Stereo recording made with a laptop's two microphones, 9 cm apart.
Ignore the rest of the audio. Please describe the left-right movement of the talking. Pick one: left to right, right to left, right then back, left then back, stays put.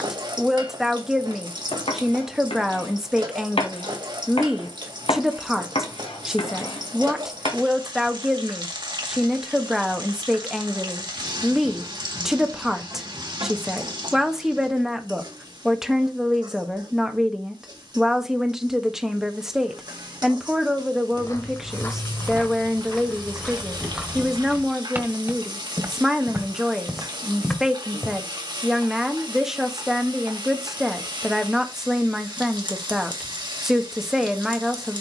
stays put.